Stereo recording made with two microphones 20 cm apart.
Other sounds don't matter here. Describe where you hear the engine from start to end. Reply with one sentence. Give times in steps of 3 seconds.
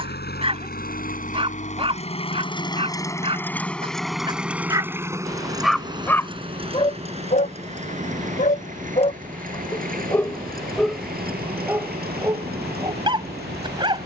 You can hear the engine on the left from 0 s, in the centre from 3 s and on the right from 6 s.